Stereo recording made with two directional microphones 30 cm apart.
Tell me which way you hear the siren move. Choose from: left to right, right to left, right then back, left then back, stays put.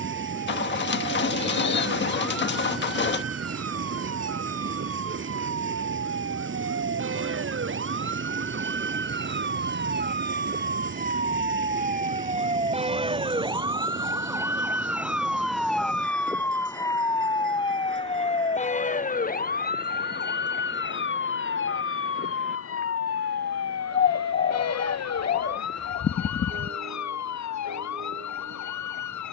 right to left.